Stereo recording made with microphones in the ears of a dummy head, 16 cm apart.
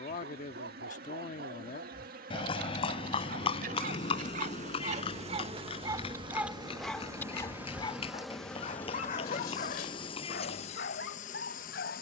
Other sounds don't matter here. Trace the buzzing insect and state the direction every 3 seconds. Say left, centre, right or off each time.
right, right, centre, left.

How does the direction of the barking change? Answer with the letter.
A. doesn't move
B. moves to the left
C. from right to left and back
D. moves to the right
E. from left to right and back
B.